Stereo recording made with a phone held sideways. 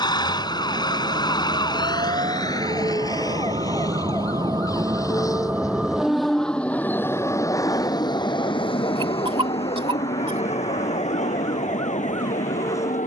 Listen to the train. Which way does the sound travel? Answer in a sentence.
In this clip you hear the train move to the left.